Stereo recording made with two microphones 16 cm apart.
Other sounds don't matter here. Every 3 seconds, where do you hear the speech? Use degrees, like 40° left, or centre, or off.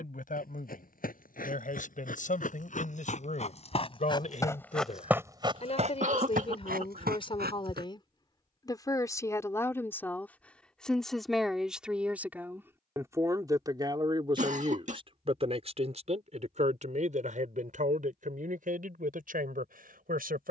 50° left, 50° left, 30° left, 10° left, 20° right, 50° right, 60° right.